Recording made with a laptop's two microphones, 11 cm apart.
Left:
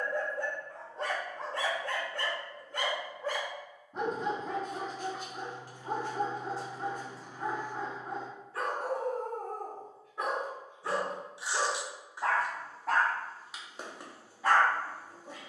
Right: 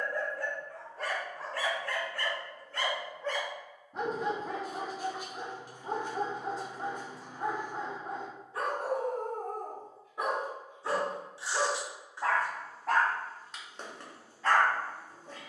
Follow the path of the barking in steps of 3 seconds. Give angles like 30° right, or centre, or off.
20° left, 10° right, 20° right, 10° right, 10° left.